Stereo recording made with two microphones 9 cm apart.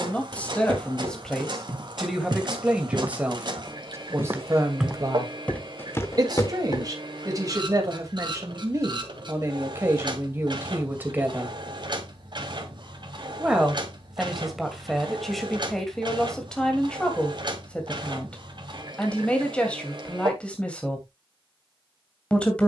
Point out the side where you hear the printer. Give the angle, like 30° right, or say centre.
50° right.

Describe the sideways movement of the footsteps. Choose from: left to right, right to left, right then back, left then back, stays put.
right to left.